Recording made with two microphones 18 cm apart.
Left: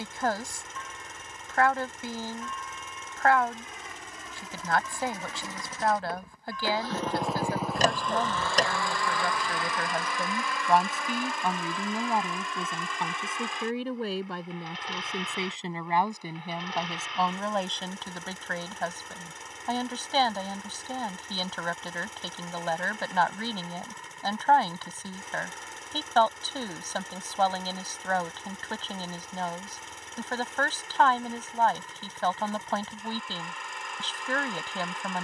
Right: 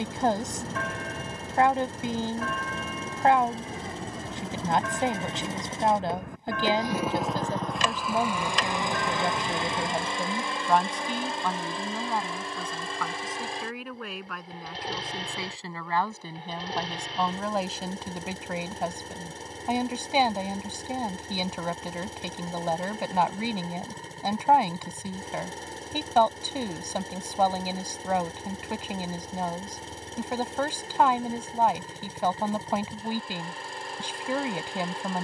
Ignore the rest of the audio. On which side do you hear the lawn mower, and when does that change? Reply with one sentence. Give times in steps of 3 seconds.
You can hear the lawn mower on the right from 0 s, in the centre from 6 s and on the right from 9 s.